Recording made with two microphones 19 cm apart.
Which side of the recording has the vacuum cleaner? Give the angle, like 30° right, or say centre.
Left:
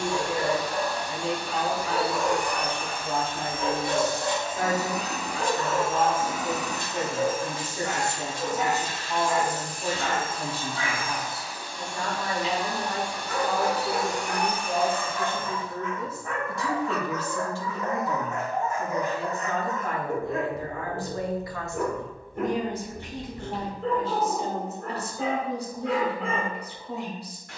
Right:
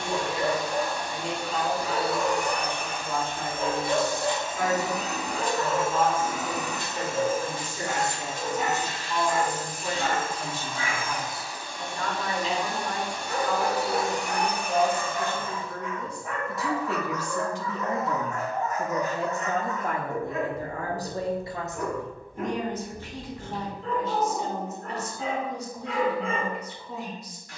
50° right.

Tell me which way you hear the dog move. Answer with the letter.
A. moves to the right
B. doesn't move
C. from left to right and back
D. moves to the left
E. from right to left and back
D.